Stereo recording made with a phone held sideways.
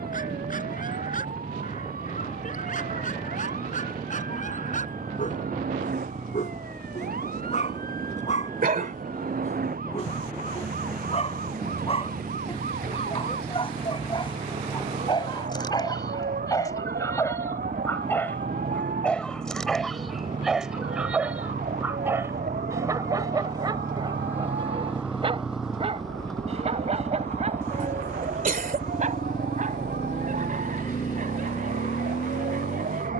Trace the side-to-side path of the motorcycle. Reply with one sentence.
In this clip you hear the motorcycle go from the right side to the left.